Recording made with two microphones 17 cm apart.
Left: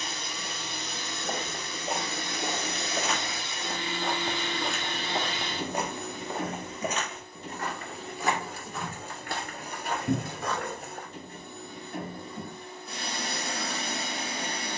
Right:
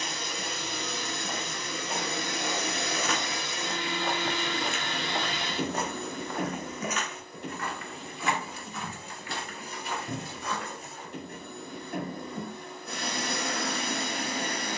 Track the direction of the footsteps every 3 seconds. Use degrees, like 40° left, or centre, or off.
50° left, 10° left, 40° left, 50° left, off.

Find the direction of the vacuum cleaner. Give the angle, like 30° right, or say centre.
70° right.